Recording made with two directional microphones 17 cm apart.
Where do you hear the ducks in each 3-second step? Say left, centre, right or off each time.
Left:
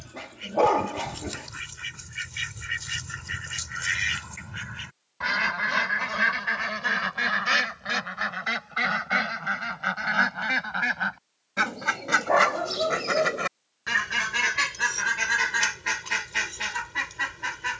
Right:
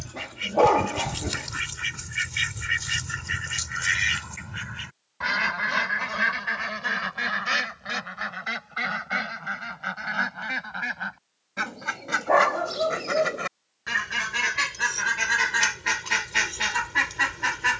right, centre, centre, left, centre, right.